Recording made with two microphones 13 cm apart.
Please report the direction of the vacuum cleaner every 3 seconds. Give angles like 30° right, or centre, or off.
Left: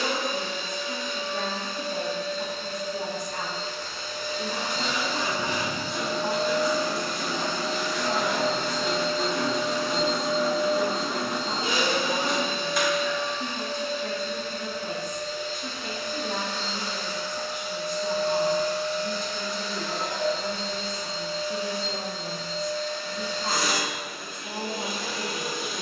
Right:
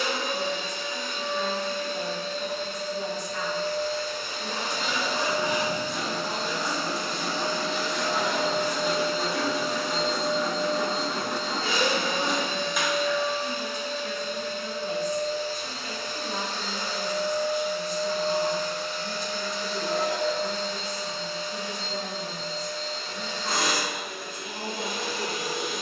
60° right, 50° right, 30° right, 10° left, 10° right, 40° right, 60° right, 60° right, 60° right.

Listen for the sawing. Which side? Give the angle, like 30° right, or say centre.
centre.